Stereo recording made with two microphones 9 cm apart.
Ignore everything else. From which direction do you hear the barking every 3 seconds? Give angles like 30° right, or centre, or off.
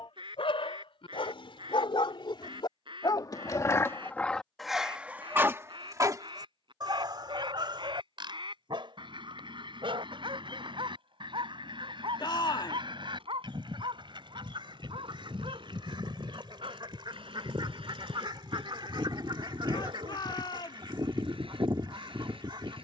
70° left, 10° left, 50° right, 70° right, 70° right, 70° right, 80° right, 80° right.